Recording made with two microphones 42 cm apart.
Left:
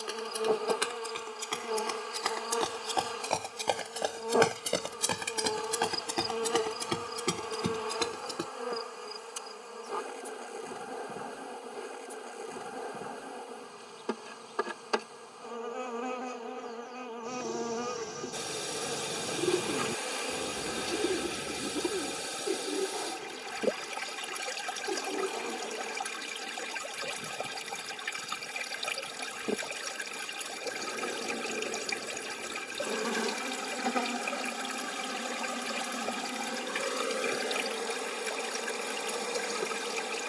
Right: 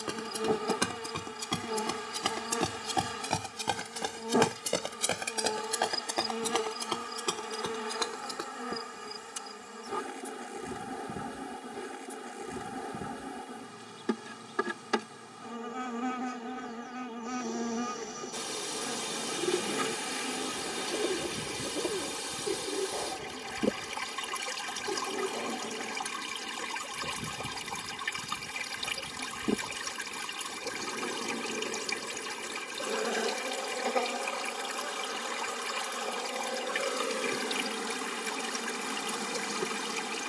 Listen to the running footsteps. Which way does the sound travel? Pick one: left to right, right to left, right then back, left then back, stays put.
right to left.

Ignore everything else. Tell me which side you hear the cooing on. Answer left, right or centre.
left.